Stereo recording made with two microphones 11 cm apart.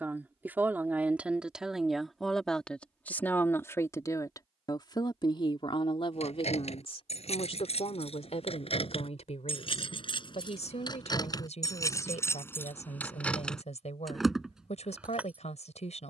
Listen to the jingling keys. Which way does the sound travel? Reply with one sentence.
You can hear the jingling keys move from left to right.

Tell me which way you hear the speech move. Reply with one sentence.
In this clip you hear the speech go from the right side to the left.